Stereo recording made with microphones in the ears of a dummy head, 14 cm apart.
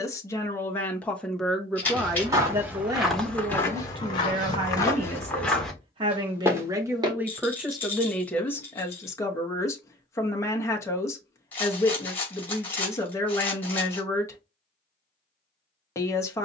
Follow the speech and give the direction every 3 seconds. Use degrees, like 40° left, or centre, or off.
centre, 40° right, 10° right, 20° left, 20° left, 20° left.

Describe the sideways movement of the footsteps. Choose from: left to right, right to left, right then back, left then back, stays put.
left then back.